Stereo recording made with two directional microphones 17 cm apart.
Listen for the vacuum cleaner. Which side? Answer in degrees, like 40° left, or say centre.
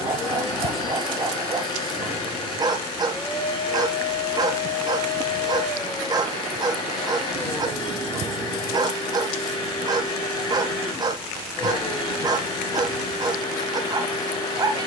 30° left.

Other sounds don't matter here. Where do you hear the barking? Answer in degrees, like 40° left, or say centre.
20° right.